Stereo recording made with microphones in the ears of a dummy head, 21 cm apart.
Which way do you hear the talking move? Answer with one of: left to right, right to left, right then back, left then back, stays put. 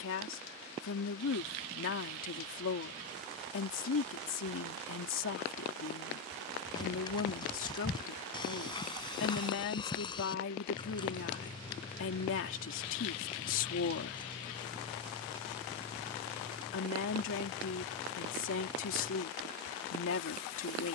stays put.